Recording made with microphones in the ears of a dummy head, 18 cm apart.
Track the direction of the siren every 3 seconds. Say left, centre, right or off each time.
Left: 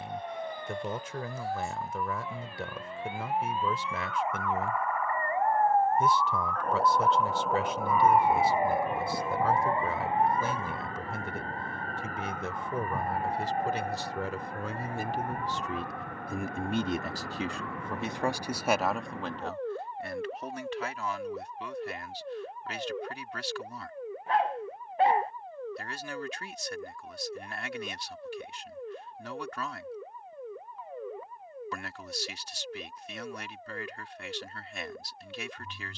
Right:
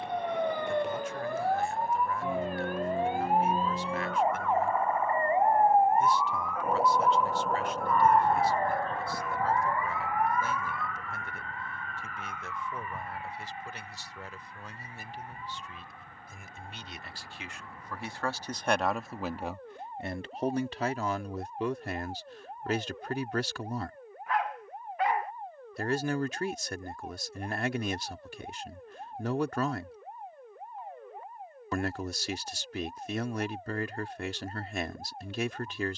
right, right, centre, left, left, left, left, left, left, left, left, left.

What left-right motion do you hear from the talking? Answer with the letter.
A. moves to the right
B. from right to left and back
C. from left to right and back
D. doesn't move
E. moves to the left
A.